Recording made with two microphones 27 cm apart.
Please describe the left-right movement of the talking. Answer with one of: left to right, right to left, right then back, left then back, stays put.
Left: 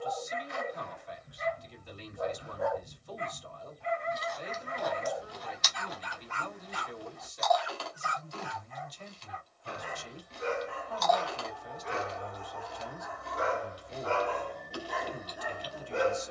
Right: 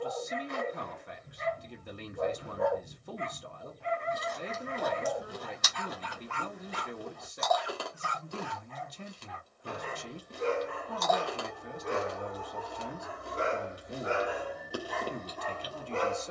stays put.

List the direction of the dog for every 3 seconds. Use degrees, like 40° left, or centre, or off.
60° right, 60° right, 60° right, 60° right, 30° right, 10° left.